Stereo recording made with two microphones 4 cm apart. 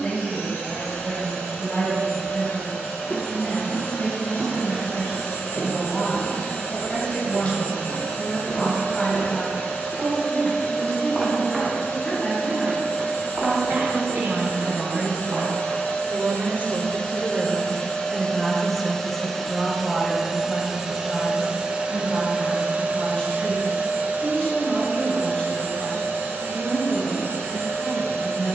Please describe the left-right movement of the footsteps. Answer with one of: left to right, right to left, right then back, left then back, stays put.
left to right.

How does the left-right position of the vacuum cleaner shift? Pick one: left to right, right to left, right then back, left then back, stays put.
left to right.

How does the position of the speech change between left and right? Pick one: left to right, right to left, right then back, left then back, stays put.
right then back.